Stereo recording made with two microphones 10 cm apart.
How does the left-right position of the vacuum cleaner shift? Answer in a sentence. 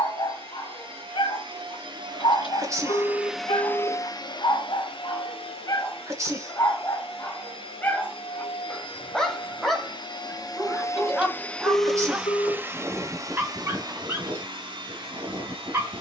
You can hear the vacuum cleaner move from right to left and back again.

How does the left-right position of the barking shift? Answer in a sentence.
You can hear the barking go from the left side to the right.